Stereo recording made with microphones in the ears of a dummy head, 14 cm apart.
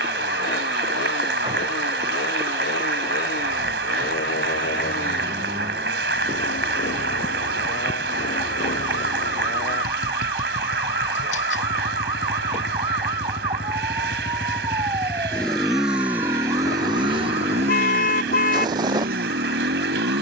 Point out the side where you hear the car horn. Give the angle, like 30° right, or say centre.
60° left.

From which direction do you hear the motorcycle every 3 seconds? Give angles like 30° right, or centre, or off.
70° left, 60° left, 60° left, 50° left, 30° left, 20° right, 60° right.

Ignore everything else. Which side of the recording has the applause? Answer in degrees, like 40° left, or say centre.
80° right.